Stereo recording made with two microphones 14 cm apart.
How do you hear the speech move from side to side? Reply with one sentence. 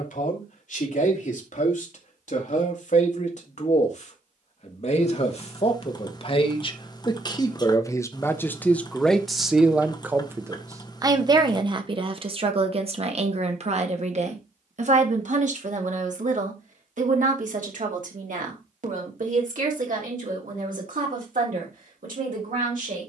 You can hear the speech go from the left side to the right.